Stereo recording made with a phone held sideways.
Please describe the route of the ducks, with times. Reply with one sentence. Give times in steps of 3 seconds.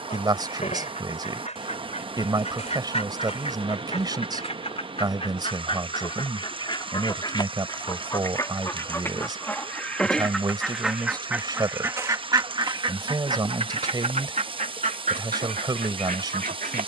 In this clip you hear the ducks on the left from 0 s, in the centre from 9 s and on the right from 12 s.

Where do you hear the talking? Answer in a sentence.
In this clip you hear the talking on the right.